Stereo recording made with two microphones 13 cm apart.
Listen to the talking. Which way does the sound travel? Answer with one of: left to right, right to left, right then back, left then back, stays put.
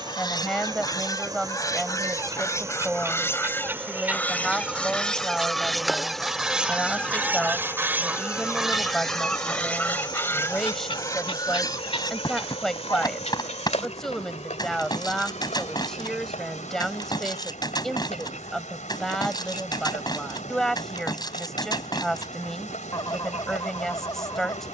stays put.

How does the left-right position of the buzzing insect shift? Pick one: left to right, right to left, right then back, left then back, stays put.
right to left.